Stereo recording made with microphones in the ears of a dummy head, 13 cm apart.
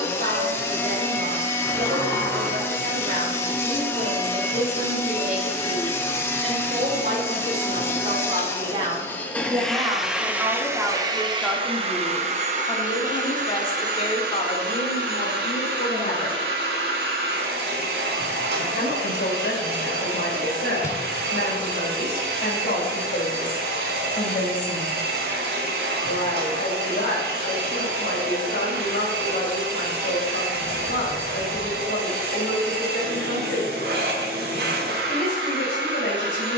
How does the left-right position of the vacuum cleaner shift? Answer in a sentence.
In this clip you hear the vacuum cleaner travel towards the right.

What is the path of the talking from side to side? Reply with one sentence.
In this clip you hear the talking go from the right side to the left.